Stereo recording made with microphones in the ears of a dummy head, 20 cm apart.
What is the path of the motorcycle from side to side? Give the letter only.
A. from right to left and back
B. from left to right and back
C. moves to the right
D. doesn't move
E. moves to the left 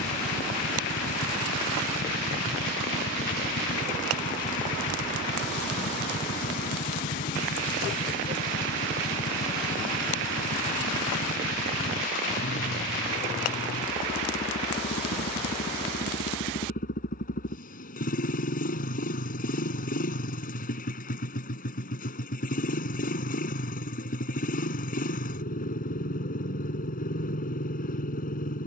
D.